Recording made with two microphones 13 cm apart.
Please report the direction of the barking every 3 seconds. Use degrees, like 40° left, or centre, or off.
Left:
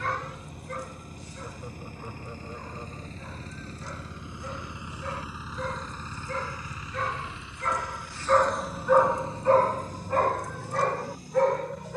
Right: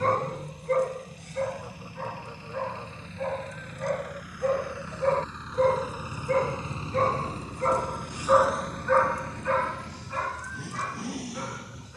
60° right, 60° right, 30° right, 50° left.